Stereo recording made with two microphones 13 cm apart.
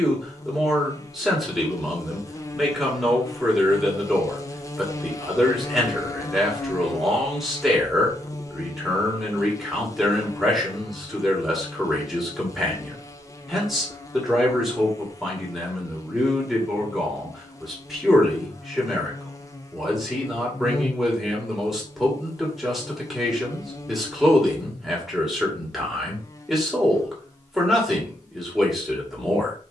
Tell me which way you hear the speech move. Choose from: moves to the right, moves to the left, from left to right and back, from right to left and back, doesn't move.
doesn't move.